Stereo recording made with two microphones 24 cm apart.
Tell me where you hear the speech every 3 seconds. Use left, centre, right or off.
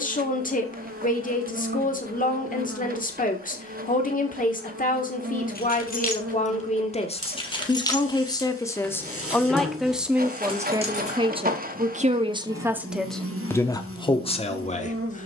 left, left, left, centre, centre.